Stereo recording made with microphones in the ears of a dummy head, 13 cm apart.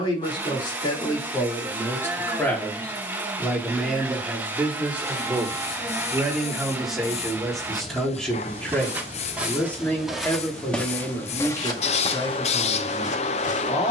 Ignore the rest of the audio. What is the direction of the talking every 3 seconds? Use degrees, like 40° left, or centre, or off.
20° left, 10° right, centre, 20° left, 30° left.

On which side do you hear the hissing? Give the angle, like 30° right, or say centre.
50° left.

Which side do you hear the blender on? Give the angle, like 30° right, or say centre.
10° right.